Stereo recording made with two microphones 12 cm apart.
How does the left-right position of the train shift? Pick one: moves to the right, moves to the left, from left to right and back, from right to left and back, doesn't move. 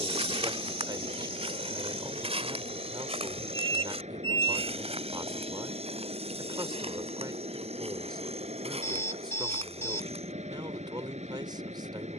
doesn't move.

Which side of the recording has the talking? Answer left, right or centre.
right.